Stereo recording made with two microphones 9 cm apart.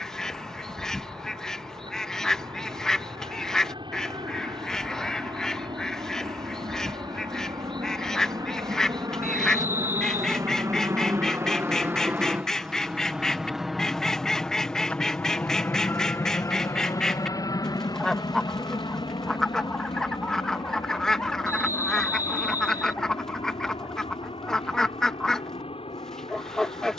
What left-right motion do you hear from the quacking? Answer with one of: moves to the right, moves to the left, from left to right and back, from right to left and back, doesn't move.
doesn't move.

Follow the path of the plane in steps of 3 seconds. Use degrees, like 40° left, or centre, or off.
70° right, 60° right, 50° right, 40° right, centre, 30° left, 50° left, 60° left, 70° left.